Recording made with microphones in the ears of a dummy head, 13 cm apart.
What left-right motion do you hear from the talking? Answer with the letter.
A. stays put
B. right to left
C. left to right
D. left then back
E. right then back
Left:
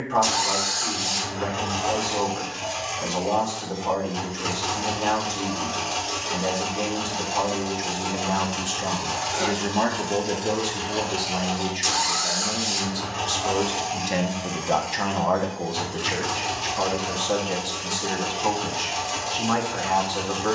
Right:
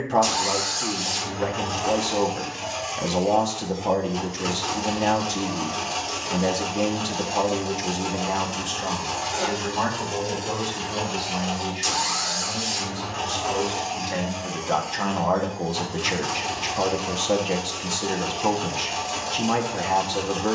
D.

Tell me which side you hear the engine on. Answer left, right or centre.
centre.